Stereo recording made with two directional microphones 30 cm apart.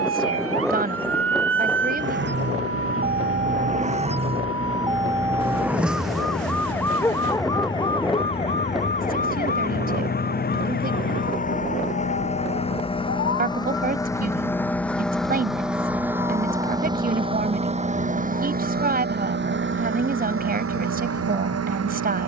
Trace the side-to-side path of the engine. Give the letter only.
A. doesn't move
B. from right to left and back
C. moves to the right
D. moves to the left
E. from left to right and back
C.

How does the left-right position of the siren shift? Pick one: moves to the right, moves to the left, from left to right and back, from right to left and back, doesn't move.
moves to the left.